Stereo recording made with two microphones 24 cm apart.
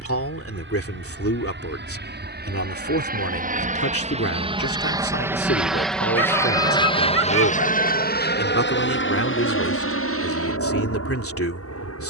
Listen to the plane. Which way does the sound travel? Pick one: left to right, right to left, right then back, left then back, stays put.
right to left.